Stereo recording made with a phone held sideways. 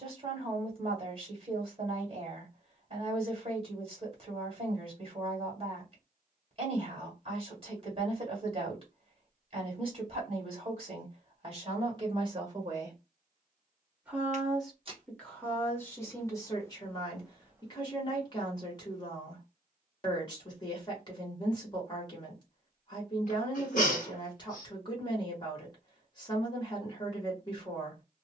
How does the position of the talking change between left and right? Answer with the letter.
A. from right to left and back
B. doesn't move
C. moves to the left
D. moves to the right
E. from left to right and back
C.